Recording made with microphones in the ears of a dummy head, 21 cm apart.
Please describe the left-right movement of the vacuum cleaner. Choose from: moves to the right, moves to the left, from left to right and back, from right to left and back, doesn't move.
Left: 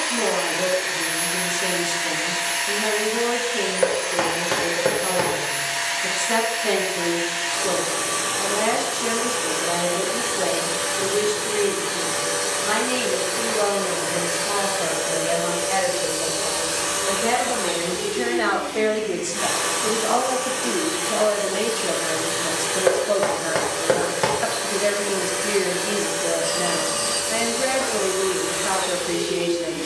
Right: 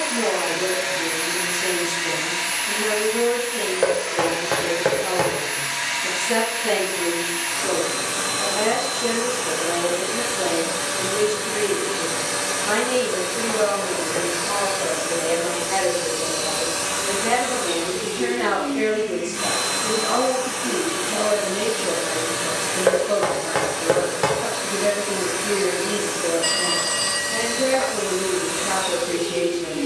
doesn't move.